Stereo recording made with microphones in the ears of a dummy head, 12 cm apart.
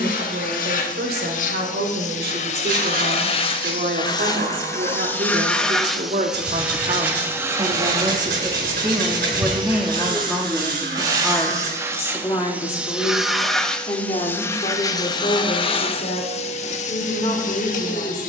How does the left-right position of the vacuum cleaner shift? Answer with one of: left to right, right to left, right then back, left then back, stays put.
right then back.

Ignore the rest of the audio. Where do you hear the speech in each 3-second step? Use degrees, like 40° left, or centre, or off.
80° right, 60° right, 40° right, centre, 30° left, 50° left.